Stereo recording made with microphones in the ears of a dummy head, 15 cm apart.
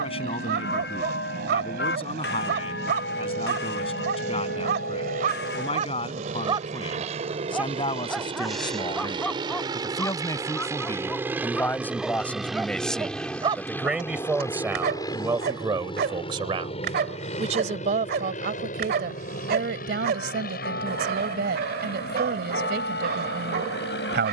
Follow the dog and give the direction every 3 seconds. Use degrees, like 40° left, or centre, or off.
70° right, 60° right, 10° right, 10° left, 30° right, 60° right, 60° right, 60° right.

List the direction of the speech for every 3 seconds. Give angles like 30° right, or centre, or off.
30° left, 30° left, 30° left, 20° left, centre, 30° right, 60° right, 60° right.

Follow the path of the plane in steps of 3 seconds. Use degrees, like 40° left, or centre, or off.
60° right, 50° right, 40° right, 20° right, 10° left, 30° left, 50° left, 60° left.